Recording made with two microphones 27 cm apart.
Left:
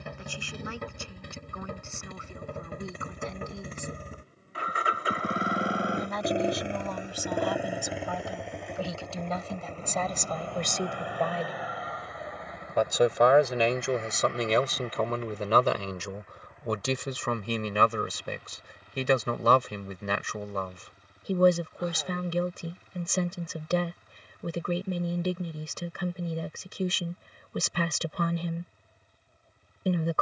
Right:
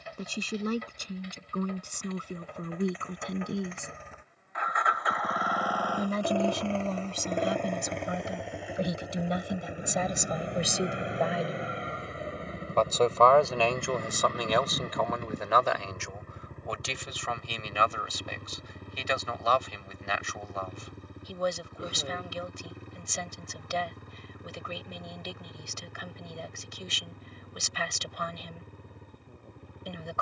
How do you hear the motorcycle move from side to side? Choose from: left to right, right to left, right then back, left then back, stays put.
left to right.